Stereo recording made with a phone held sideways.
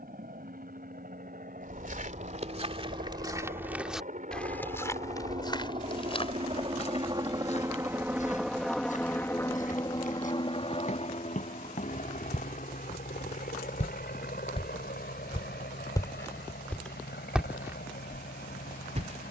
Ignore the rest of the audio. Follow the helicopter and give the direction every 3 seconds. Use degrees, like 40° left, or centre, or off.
70° right, 50° right, 20° right, 30° left, 60° left, 70° left, 70° left.